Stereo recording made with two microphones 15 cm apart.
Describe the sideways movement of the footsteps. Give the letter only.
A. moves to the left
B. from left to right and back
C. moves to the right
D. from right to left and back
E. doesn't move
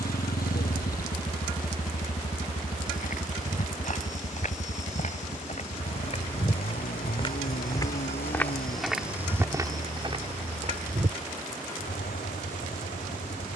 C.